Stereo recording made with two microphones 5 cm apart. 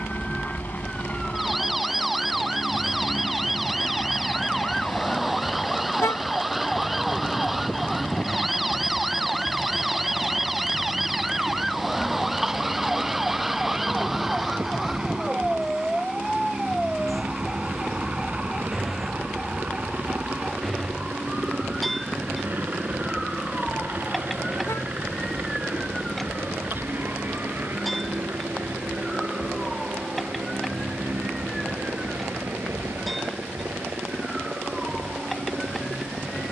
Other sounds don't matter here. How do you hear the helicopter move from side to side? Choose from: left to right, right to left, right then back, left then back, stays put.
left to right.